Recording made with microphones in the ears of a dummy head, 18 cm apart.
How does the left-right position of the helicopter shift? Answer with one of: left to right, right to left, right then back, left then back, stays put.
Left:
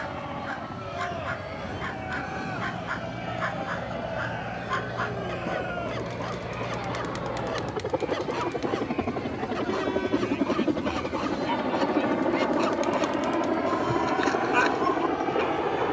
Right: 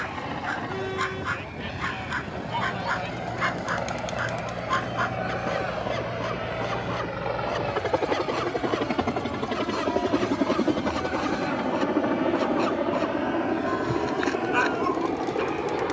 right to left.